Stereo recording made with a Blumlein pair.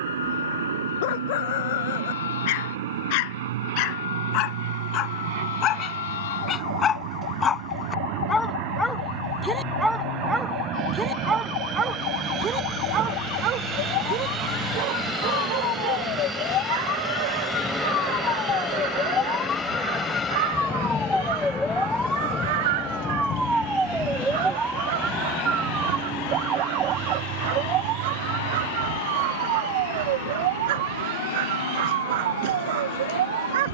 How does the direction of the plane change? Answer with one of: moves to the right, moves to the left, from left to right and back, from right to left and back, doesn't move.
moves to the left.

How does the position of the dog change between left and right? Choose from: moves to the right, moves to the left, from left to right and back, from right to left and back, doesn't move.
moves to the right.